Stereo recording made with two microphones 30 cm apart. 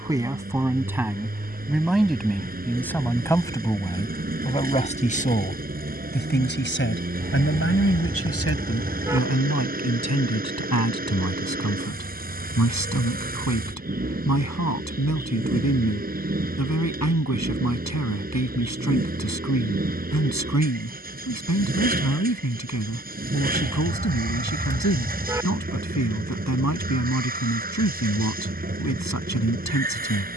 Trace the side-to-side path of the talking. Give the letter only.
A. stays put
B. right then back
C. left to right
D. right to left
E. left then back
D.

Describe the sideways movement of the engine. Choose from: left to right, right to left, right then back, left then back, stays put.
stays put.